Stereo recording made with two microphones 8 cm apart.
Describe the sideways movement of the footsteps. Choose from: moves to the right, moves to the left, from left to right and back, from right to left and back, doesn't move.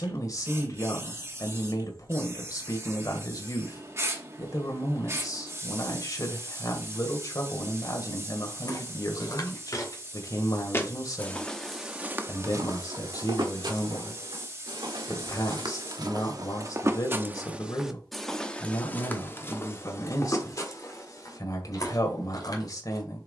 from left to right and back.